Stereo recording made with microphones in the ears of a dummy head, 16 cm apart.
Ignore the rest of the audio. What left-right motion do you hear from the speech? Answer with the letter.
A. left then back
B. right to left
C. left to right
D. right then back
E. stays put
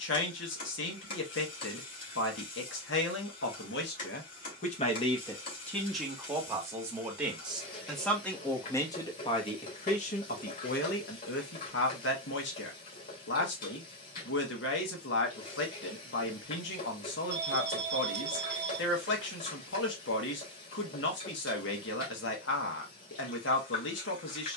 D.